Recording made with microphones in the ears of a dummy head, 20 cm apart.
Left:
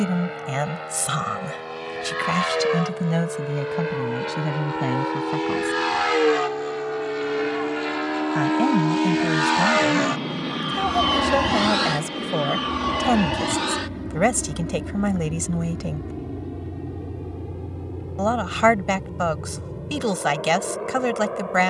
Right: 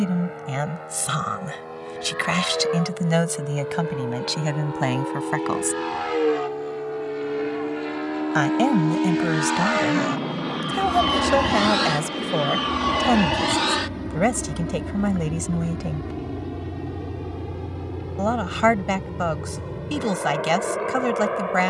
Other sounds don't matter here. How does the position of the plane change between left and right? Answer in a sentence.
You can hear the plane move from left to right.